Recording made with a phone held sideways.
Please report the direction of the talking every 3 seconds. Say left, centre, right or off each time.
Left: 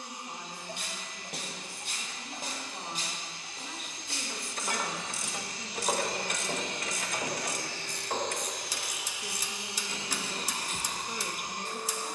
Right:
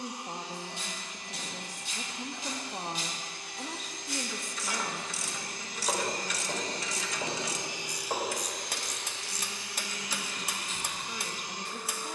right, centre, left, left.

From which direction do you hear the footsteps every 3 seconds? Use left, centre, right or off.
left, left, centre, off.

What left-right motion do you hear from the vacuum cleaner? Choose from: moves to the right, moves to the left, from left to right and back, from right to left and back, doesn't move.
moves to the left.